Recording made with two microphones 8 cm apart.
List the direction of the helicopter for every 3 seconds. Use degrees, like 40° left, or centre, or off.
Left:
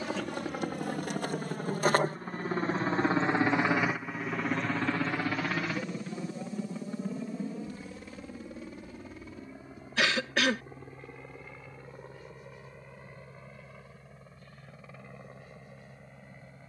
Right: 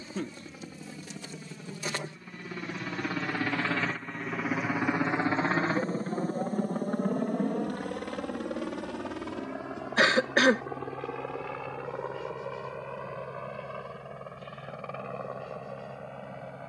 50° left, centre, 50° right, 70° right, 70° right, 80° right.